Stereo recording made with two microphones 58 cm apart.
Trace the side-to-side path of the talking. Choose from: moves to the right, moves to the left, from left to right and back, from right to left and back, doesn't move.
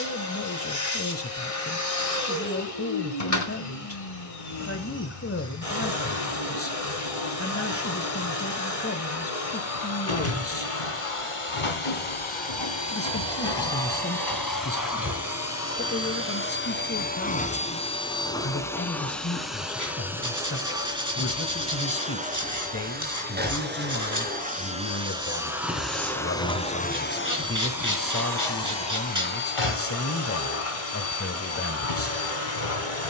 doesn't move.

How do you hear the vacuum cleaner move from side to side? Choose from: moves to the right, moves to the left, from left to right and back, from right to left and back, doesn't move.
from left to right and back.